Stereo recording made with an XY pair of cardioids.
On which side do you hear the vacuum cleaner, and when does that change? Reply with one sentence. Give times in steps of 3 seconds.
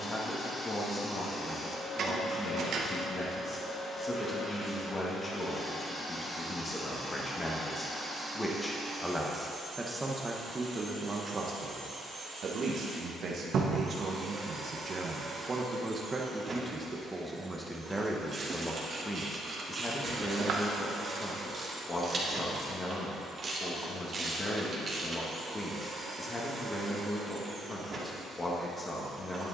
You can hear the vacuum cleaner on the left from 0 s, in the centre from 6 s and on the right from 9 s.